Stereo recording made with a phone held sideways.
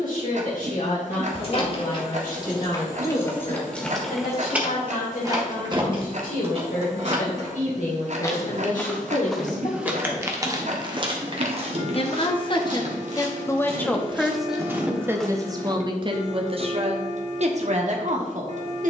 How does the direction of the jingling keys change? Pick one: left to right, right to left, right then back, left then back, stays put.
left to right.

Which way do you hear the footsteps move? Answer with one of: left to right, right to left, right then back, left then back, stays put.
right then back.